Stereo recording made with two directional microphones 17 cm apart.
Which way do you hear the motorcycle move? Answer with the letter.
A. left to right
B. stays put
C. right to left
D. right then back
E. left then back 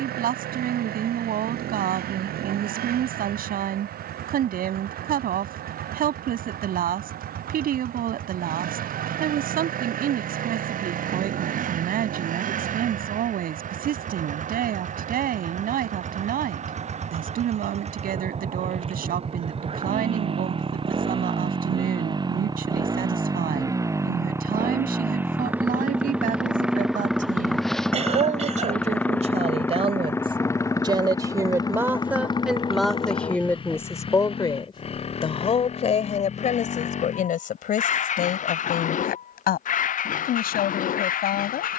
C.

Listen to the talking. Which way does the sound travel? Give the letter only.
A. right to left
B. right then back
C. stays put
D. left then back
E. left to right
A.